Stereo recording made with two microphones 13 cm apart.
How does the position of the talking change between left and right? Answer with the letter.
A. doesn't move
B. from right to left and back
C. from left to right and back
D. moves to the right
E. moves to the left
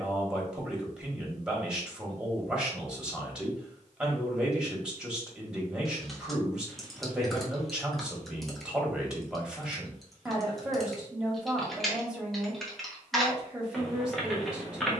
A.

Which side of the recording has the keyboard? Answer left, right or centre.
centre.